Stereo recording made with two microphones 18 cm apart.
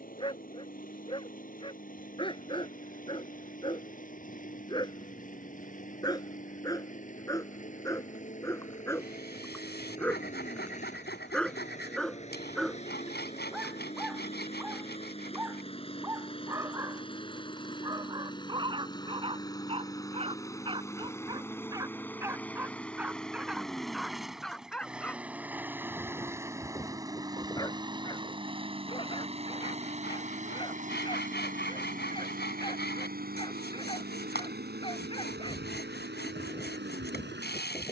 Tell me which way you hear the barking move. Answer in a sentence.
In this clip you hear the barking go right and come back.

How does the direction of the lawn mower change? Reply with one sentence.
You can hear the lawn mower travel towards the right.